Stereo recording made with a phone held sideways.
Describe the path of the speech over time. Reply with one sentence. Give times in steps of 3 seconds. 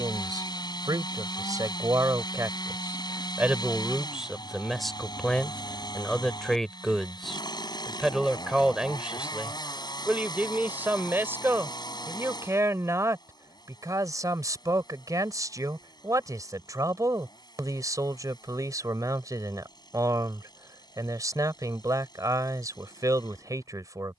In this clip you hear the speech on the right from 0 s, in the centre from 3 s and on the right from 12 s.